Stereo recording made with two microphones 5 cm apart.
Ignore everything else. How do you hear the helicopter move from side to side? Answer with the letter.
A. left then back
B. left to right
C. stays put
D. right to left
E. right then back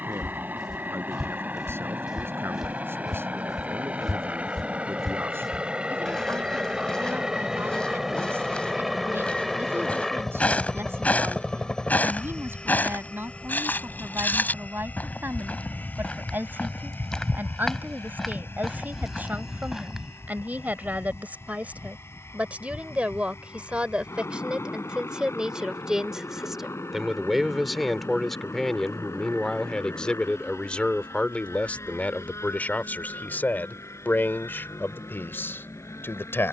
D.